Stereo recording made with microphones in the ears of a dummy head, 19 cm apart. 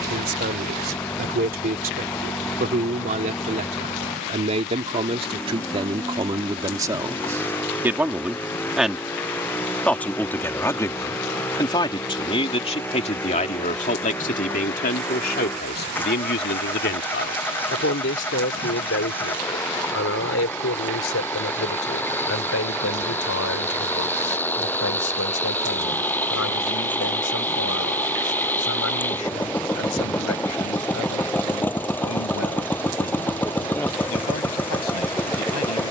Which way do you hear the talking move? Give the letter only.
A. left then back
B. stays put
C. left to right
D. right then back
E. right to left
E.